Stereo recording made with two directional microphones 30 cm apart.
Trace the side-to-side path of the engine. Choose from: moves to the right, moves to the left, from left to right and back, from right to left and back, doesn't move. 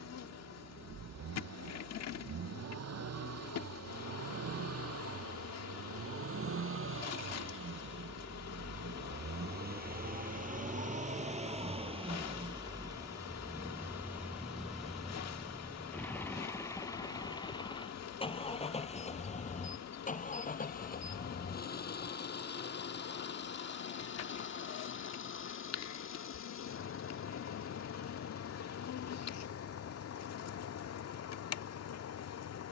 moves to the left.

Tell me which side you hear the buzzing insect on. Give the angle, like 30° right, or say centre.
60° left.